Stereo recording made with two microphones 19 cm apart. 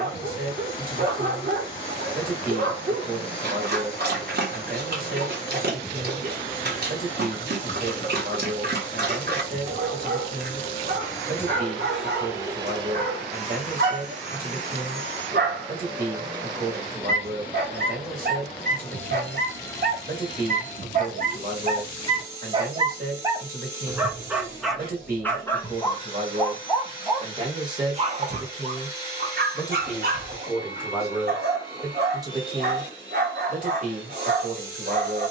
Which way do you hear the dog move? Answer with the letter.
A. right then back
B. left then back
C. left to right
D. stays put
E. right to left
B.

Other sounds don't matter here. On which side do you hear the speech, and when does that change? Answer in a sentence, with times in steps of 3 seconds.
You can hear the speech on the right from 0 s, in the centre from 27 s and on the right from 33 s.